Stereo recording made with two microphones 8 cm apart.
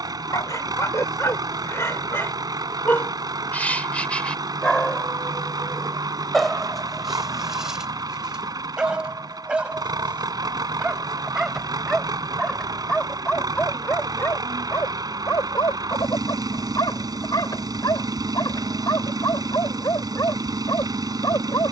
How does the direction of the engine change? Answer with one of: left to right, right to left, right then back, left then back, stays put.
stays put.